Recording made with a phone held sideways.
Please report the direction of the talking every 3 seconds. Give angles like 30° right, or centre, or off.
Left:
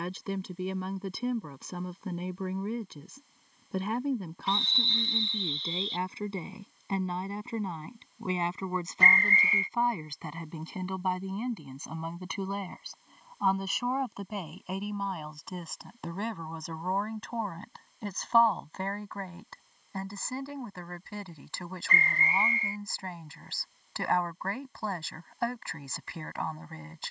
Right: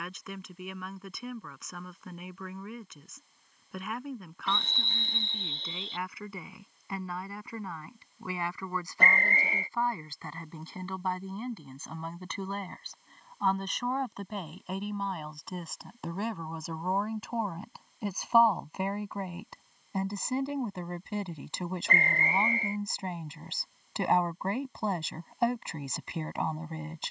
30° left, 30° left, 30° left, 20° left, 10° left, centre, 20° right, 20° right, 20° right.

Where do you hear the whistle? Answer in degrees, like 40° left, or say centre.
60° right.